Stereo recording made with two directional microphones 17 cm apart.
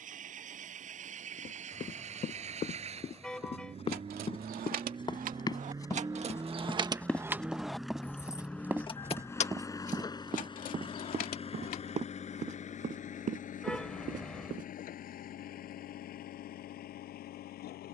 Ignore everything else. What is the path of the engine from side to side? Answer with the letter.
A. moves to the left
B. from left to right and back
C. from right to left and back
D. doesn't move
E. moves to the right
A.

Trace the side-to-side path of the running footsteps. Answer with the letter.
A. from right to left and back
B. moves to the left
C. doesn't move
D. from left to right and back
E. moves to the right
E.